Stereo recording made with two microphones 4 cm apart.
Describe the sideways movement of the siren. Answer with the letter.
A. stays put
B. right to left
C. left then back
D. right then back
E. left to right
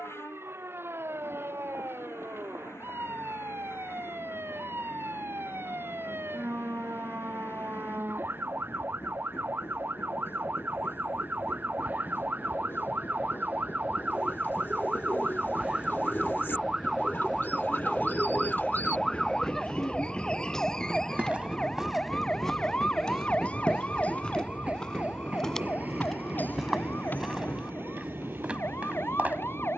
B.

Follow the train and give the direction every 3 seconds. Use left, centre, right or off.
left, left, left, left, left, left, left, centre, right, right.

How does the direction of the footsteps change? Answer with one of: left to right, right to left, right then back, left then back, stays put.
left then back.